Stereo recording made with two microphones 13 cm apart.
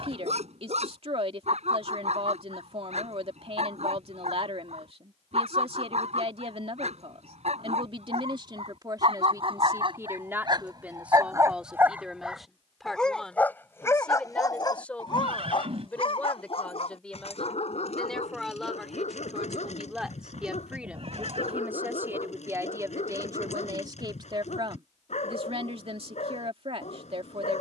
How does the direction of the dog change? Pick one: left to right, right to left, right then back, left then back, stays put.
right to left.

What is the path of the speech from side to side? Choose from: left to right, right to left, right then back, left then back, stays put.
left then back.